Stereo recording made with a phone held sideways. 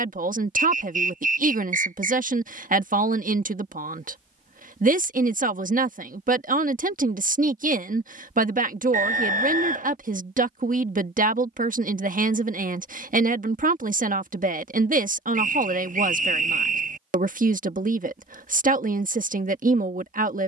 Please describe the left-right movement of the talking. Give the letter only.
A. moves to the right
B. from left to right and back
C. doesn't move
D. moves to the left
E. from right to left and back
C.